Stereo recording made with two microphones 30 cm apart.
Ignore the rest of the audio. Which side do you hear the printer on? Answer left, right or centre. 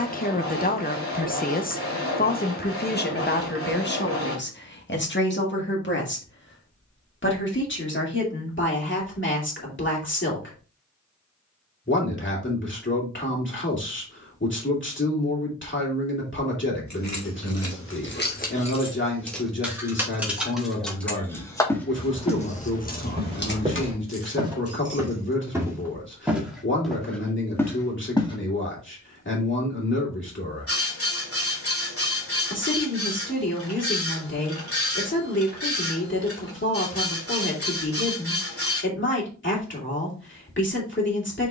left.